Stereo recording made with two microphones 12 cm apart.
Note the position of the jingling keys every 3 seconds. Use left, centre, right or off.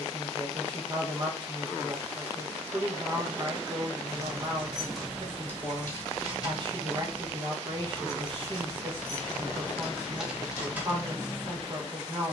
off, centre, left, centre.